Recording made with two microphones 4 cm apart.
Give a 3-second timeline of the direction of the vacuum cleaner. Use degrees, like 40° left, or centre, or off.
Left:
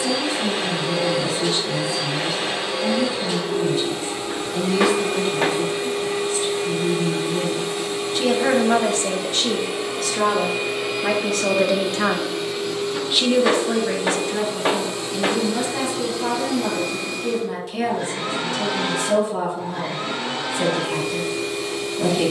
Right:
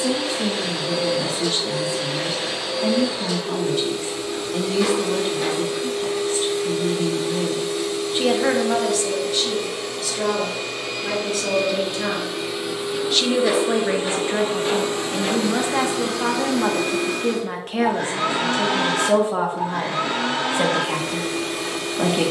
30° left, 30° left, 30° left, 20° left, 20° right, 60° right, 70° right, 70° right.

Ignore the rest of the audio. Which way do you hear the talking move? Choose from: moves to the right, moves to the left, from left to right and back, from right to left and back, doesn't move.
from right to left and back.